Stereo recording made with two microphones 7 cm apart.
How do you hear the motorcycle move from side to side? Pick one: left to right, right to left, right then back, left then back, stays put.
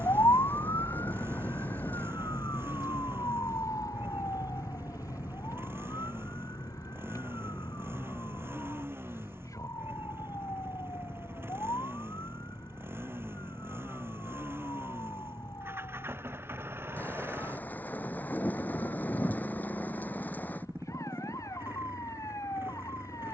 stays put.